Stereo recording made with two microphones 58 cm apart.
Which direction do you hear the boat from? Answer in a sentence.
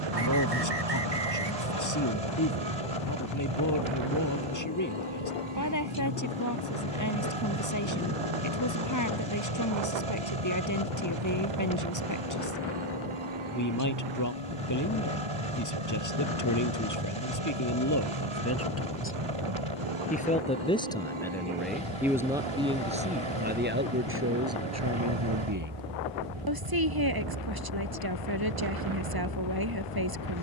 In this clip you hear the boat on the right.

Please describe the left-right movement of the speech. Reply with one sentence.
You can hear the speech move to the right.